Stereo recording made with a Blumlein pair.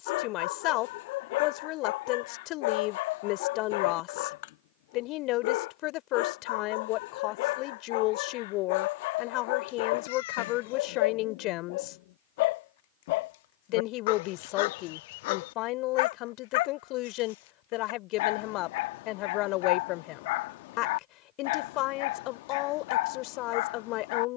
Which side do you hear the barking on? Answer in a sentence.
You can hear the barking on the left.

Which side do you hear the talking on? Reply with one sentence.
In this clip you hear the talking on the left.